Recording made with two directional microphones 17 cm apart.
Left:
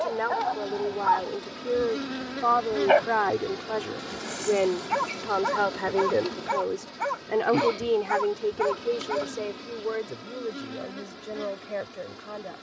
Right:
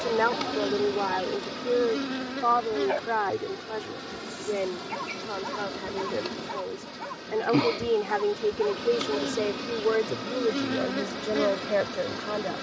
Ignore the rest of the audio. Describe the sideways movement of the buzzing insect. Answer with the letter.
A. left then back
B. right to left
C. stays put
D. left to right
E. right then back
A.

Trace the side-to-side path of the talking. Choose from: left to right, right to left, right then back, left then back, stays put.
left then back.